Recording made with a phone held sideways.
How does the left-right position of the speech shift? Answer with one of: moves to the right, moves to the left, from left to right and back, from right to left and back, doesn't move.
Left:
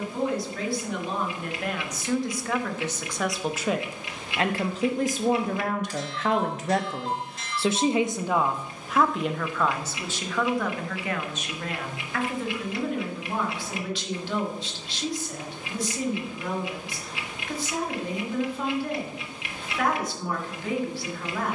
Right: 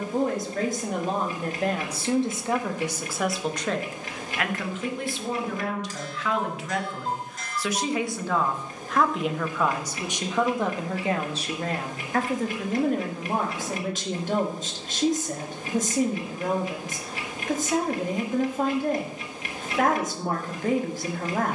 from right to left and back.